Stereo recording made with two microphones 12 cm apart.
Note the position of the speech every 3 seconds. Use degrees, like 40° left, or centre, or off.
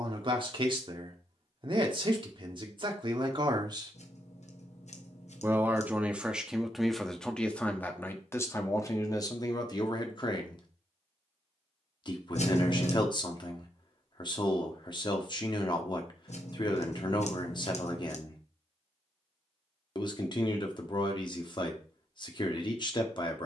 40° right, 30° right, 10° left, 40° left, 40° left, 40° left, 40° left, 40° left.